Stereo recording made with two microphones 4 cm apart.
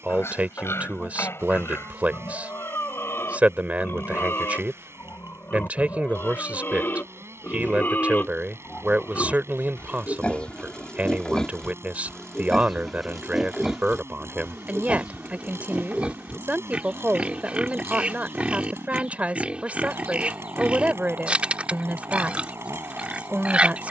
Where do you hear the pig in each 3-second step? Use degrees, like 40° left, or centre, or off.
70° left, 60° left, 50° left, 20° left, 10° right, 30° right, 30° right, 30° right.